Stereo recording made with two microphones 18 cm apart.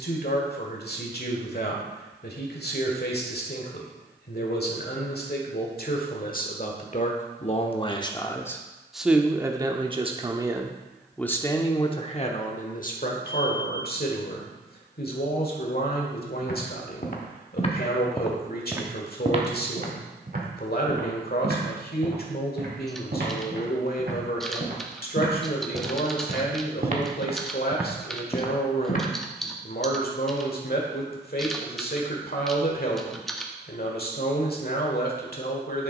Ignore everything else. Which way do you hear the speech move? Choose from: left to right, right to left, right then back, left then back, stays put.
right then back.